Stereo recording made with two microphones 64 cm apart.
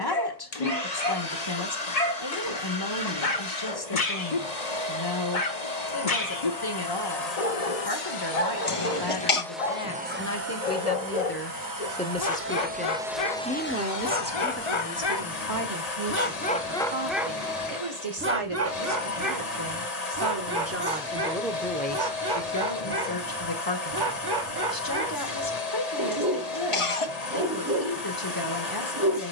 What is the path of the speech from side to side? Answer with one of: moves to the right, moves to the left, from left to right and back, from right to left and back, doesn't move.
from left to right and back.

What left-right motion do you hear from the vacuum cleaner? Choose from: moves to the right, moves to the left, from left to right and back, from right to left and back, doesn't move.
from left to right and back.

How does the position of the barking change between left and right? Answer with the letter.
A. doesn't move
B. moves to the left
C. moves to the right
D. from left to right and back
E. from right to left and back
C.